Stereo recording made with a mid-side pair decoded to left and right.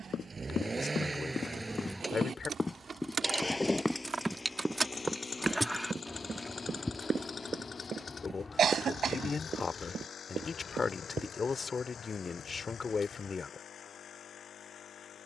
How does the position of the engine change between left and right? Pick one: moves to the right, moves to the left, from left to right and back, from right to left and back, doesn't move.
moves to the left.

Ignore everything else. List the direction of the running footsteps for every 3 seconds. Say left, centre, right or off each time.
left, centre, right, right, off.